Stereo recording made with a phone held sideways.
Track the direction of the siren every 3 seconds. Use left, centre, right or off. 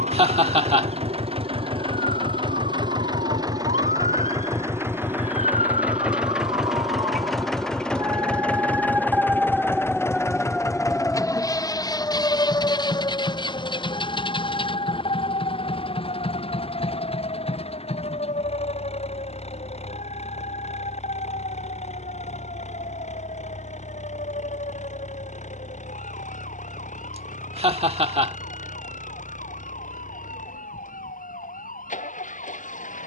right, right, right, centre, left, left, left, left, left, left, left.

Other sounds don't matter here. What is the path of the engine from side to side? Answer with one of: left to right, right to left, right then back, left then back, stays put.
right to left.